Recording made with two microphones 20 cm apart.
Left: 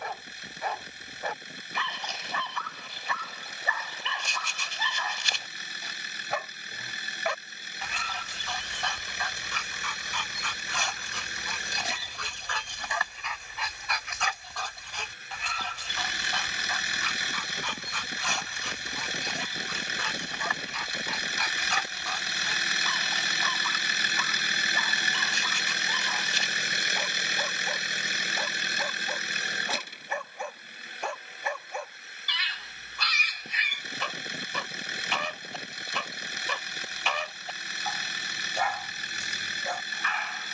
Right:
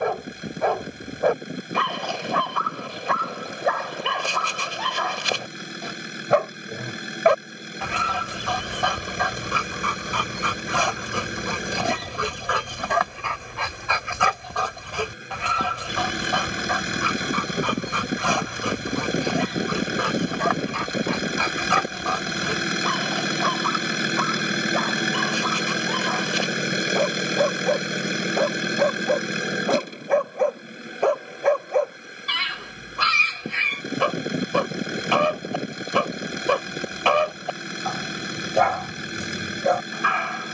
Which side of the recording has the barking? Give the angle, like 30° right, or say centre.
70° right.